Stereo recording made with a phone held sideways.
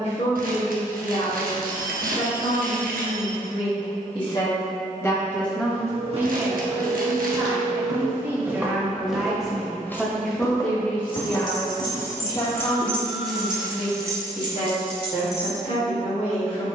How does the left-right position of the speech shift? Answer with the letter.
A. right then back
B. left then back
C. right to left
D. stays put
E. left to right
A.